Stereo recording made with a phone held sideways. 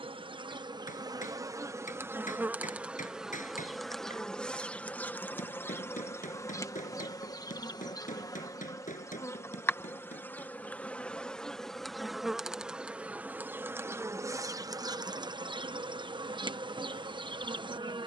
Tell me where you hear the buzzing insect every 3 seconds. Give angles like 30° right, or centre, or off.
20° right, 10° left, 20° left, 10° left, 10° right, 30° right.